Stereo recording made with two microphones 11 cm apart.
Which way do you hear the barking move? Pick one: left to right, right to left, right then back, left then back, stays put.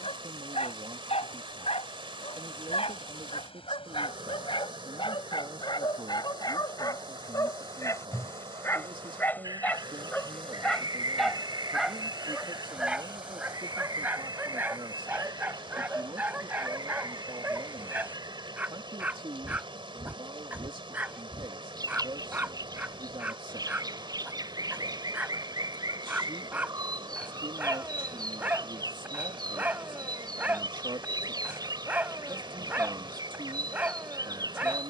left to right.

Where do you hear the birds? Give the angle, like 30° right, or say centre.
40° right.